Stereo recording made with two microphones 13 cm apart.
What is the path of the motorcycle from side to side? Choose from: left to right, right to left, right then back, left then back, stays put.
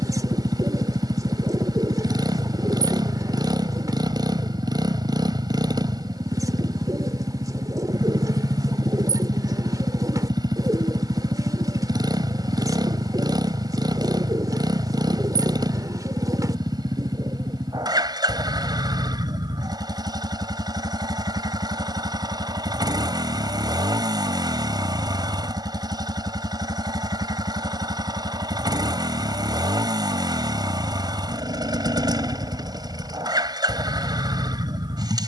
stays put.